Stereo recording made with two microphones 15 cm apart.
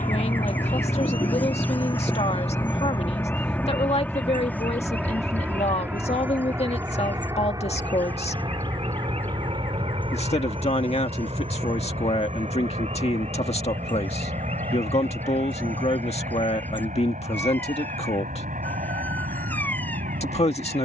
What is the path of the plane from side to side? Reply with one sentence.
In this clip you hear the plane go from the left side to the right.